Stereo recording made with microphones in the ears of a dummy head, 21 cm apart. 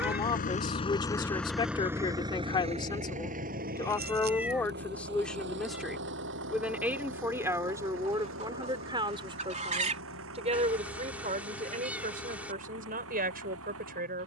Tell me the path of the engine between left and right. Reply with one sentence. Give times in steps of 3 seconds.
You can hear the engine in the centre from 0 s and on the right from 3 s.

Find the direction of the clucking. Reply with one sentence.
You can hear the clucking on the right.